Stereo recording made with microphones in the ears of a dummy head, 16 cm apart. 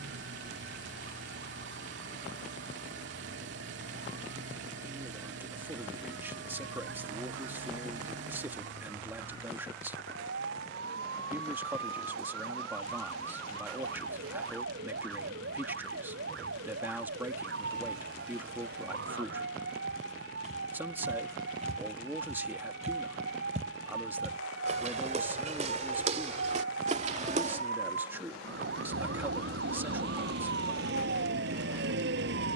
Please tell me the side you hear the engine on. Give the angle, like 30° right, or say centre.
70° right.